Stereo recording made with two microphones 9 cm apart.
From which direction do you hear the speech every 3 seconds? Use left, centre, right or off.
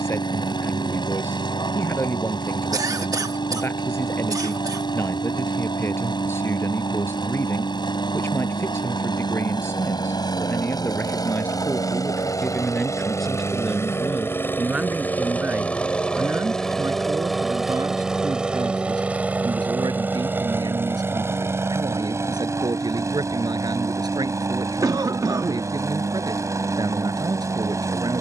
left, left, left, left, centre, right, right, right, right, right.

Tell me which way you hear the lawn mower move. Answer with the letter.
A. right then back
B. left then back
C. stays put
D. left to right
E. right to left
D.